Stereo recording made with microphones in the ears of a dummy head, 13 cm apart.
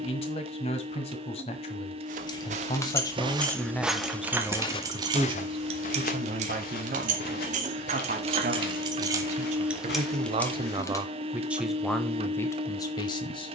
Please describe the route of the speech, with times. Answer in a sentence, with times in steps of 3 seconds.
In this clip you hear the speech on the left from 0 s, in the centre from 3 s, on the right from 6 s and on the left from 12 s.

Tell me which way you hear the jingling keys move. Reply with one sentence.
You can hear the jingling keys move from left to right and back again.